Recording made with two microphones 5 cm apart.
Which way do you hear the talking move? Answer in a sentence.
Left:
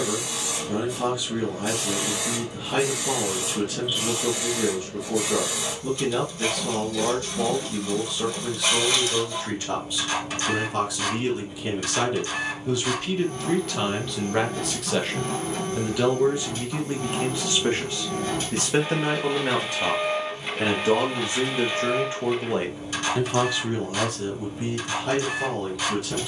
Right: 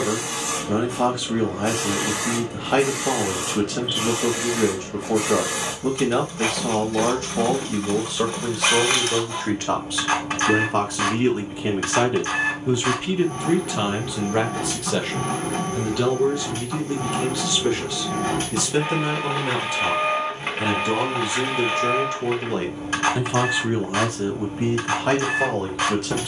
You can hear the talking move from right to left and back again.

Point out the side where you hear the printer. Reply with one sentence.
In this clip you hear the printer on the right.